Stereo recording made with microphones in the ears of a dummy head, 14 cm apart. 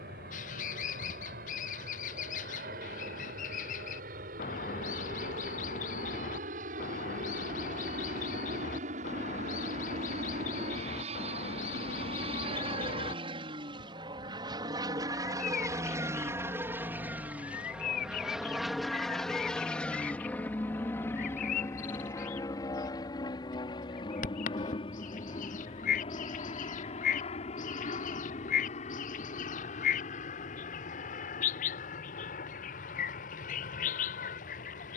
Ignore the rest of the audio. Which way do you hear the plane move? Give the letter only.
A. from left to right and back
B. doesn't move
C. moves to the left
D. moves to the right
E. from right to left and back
C.